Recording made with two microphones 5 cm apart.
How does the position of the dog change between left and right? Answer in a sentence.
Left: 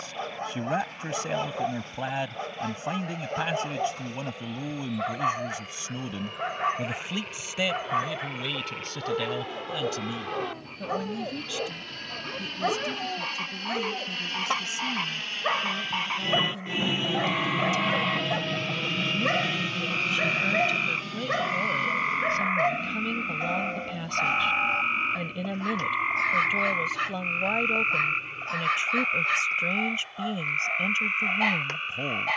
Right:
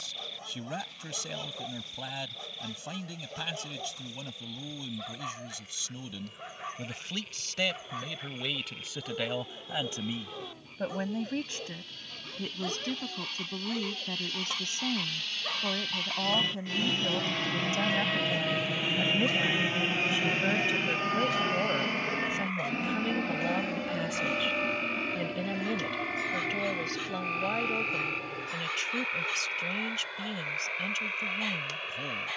You can hear the dog stay put.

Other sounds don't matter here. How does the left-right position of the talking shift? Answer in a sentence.
In this clip you hear the talking move from left to right and back again.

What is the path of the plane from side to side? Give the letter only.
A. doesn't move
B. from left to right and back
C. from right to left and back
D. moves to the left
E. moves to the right
E.